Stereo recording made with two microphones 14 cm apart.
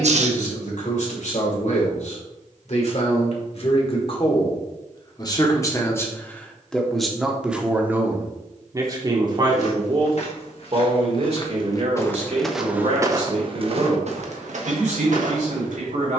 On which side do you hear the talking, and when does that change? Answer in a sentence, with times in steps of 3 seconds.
You can hear the talking on the left from 0 s, in the centre from 6 s and on the right from 9 s.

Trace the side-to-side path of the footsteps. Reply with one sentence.
In this clip you hear the footsteps travel towards the right.